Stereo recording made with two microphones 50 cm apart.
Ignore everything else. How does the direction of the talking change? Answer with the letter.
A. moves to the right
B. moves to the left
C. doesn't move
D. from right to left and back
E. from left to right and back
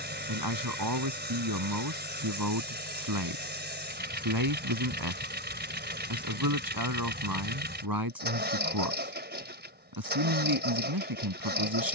C.